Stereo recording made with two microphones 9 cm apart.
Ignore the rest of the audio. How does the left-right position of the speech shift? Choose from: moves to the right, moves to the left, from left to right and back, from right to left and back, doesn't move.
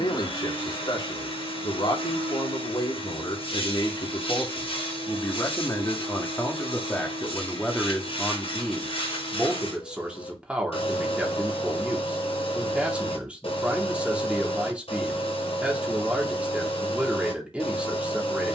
moves to the right.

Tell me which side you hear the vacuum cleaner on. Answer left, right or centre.
left.